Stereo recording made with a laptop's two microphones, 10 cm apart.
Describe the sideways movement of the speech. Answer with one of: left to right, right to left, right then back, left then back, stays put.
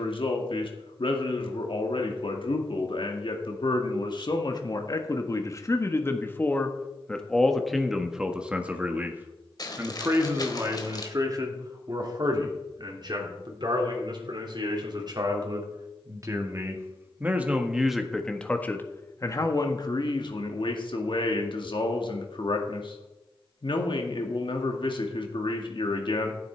right then back.